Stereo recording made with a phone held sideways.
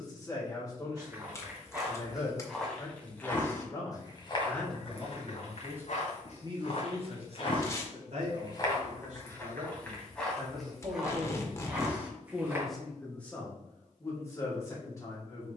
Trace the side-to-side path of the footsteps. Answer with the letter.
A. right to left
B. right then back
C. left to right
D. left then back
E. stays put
D.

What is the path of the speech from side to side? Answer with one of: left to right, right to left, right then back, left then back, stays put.
right then back.